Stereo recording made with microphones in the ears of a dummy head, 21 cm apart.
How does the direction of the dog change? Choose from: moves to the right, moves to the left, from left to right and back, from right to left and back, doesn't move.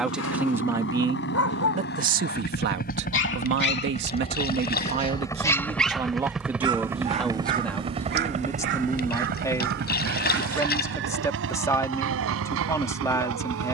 moves to the right.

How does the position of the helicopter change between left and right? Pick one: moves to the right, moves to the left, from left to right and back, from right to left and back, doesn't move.
moves to the right.